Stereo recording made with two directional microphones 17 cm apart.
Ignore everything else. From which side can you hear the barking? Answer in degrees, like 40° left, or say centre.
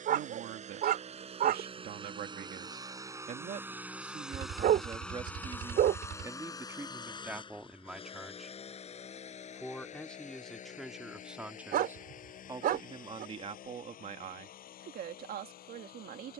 60° right.